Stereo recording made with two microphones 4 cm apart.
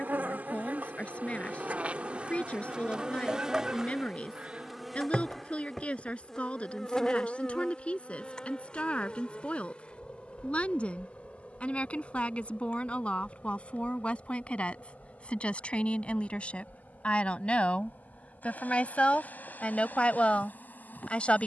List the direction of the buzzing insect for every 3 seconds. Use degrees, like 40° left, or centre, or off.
40° right, 10° right, 20° left, 30° left, 40° left, 50° left, 50° left.